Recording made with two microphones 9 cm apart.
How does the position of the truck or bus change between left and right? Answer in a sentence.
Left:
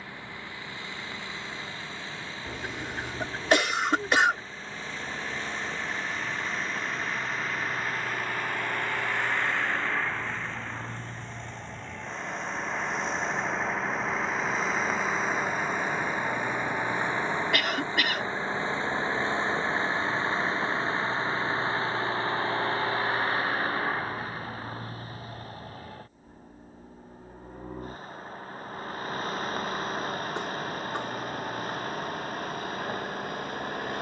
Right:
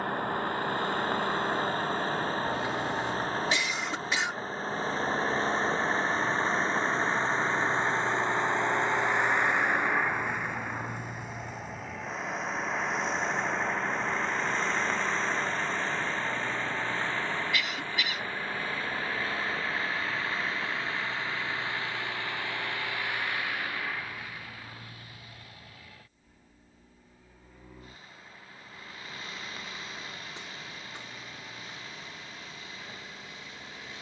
You can hear the truck or bus go from the right side to the left.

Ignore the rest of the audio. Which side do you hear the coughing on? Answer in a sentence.
You can hear the coughing on the left.